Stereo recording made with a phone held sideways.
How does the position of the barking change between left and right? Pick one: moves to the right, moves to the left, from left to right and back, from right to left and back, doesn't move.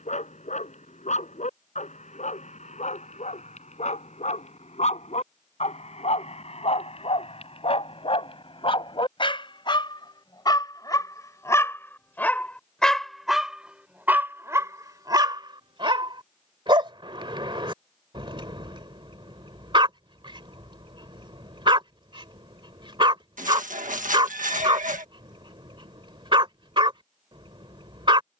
moves to the right.